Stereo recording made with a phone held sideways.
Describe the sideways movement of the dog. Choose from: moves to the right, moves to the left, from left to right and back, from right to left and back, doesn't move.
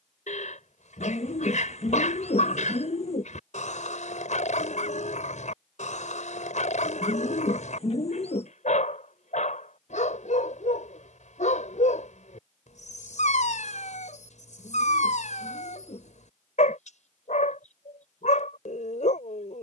doesn't move.